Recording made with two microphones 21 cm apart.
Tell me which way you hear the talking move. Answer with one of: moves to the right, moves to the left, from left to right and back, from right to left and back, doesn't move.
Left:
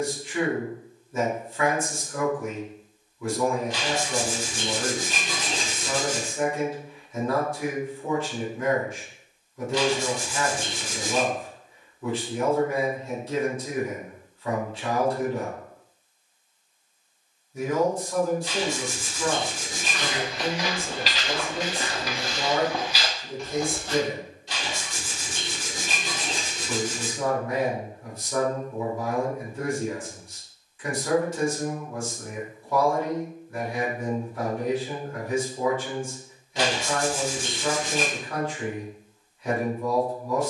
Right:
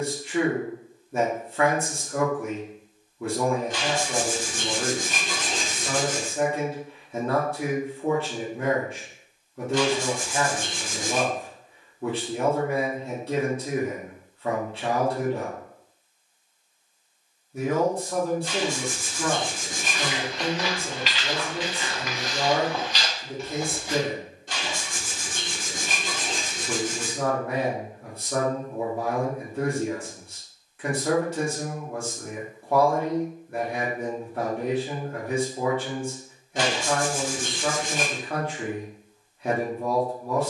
doesn't move.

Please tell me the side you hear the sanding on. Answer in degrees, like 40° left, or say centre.
50° right.